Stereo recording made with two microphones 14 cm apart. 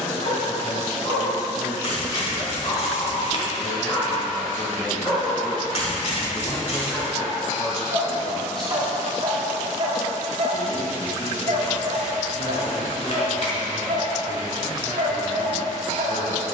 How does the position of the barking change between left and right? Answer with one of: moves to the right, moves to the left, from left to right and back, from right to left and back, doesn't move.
moves to the right.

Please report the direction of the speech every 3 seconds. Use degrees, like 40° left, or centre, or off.
20° right, centre, 30° left, 60° left, 60° left, 60° left.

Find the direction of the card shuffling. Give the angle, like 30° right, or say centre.
50° left.